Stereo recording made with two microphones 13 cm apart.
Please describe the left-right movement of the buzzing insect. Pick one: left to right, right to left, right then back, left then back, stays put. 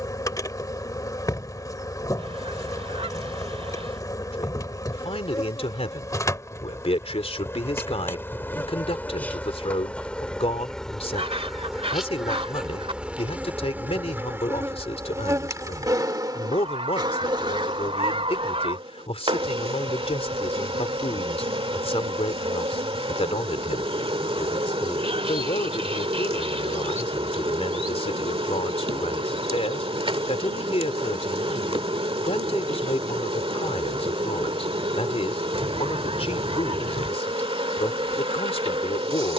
left to right.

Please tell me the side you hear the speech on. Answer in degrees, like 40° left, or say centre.
50° left.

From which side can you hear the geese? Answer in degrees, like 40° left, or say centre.
50° right.